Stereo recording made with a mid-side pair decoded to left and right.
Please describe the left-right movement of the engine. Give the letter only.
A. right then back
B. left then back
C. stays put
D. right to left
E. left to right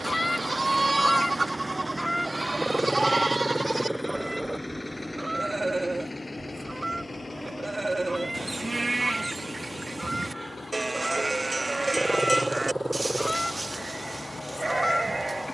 D.